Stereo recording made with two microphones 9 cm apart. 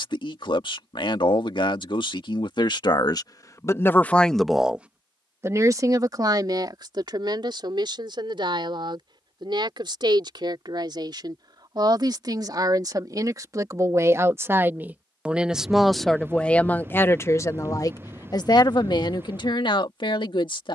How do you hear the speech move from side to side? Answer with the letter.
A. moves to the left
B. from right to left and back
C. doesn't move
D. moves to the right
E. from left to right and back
E.